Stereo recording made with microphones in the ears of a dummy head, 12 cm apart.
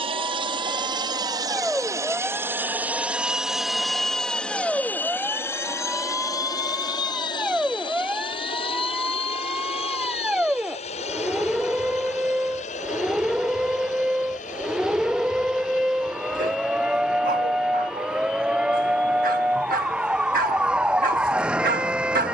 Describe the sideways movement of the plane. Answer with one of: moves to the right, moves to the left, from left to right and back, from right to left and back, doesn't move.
moves to the left.